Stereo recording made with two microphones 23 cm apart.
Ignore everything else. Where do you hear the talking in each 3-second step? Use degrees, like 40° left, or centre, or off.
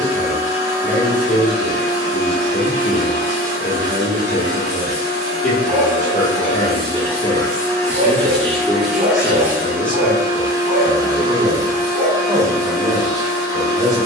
50° left, 50° left, 40° left, centre, 20° right.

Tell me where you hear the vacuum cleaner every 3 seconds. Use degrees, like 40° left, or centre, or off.
60° left, 50° left, 10° left, 20° right, 20° right.